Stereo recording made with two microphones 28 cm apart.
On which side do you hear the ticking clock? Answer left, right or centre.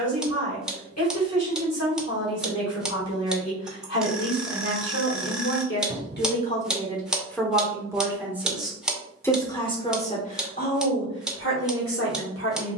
centre.